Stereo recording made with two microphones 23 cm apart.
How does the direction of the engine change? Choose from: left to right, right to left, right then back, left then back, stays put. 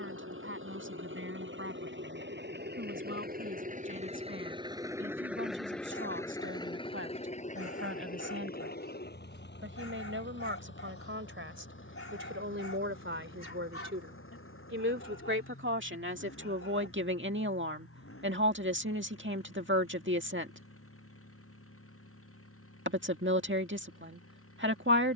right to left.